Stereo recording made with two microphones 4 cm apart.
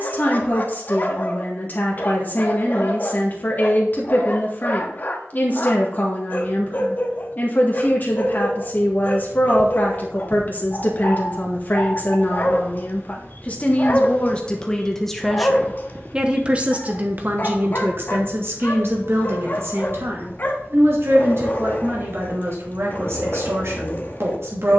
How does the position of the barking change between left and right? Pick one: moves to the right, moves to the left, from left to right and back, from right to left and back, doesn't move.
doesn't move.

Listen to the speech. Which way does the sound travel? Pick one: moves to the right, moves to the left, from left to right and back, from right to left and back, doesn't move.
moves to the right.